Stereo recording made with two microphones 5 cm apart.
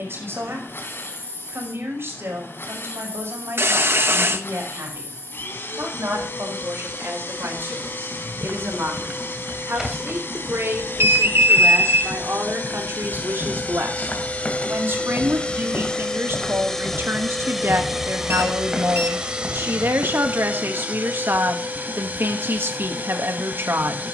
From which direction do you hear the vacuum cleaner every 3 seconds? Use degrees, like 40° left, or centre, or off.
60° left, 60° left, 60° left, 60° left, 40° left, 10° left, 20° right, 40° right.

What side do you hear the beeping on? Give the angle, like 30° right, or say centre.
60° right.